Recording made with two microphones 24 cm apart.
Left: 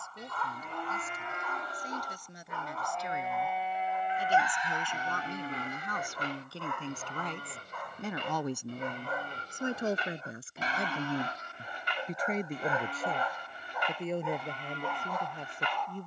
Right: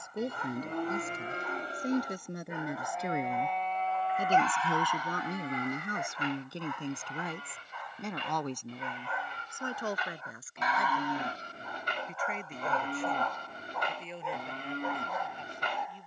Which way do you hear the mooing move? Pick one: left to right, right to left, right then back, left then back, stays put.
left then back.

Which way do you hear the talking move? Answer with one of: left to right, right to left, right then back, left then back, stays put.
right to left.